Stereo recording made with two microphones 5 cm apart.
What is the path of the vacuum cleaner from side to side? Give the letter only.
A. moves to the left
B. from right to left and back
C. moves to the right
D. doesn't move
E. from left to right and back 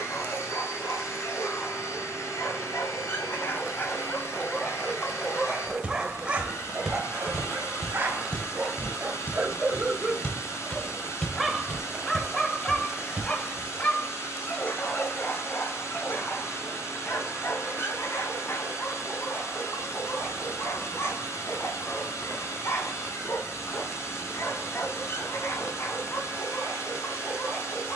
D.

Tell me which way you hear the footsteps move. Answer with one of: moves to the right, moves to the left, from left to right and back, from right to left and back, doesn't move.
from right to left and back.